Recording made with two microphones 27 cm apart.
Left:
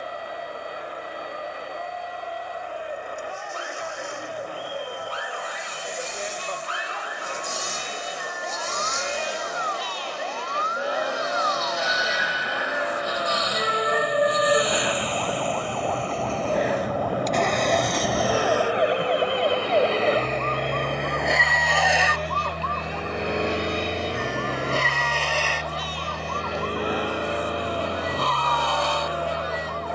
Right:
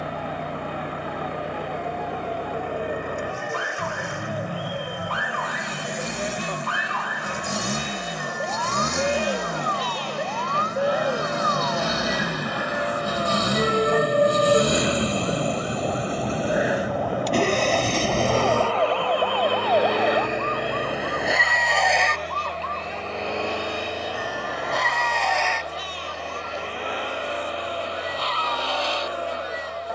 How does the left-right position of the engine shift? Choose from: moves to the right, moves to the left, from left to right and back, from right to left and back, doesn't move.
moves to the left.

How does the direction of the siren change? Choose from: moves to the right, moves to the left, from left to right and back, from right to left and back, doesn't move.
moves to the left.